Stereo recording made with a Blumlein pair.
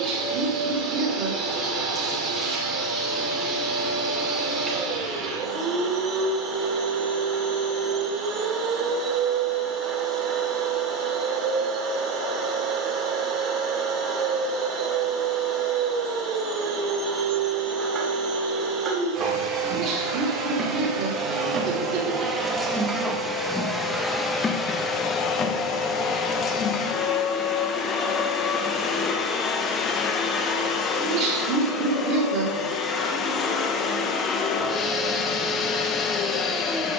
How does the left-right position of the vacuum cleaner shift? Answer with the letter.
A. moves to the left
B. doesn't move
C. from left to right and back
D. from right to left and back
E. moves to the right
A.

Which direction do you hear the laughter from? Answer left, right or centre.
right.